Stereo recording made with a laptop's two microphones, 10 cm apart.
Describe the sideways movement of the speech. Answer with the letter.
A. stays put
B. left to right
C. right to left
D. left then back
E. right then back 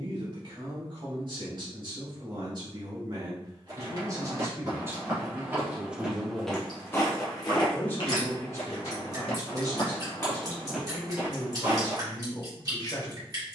C.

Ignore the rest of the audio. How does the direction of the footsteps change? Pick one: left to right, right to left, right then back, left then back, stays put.
left then back.